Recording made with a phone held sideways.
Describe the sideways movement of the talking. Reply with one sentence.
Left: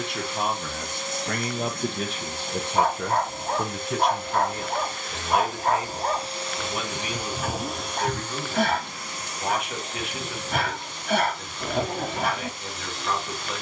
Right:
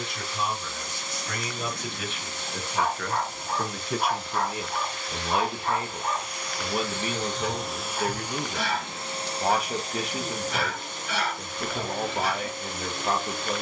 In this clip you hear the talking travel towards the right.